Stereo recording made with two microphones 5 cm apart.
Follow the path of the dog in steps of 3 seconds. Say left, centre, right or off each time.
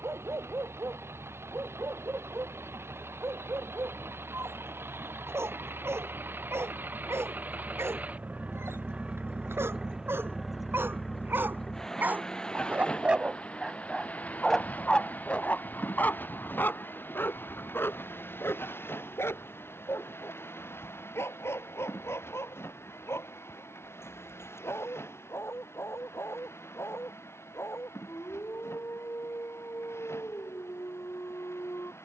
right, right, right, right, centre, left, left, left, left, left, left.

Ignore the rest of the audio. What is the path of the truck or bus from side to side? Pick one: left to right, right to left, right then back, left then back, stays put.
right to left.